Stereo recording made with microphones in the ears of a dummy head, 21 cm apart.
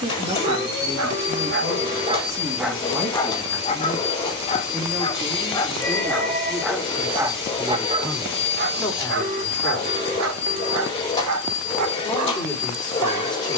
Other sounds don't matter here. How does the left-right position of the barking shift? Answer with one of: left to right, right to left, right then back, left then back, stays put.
left then back.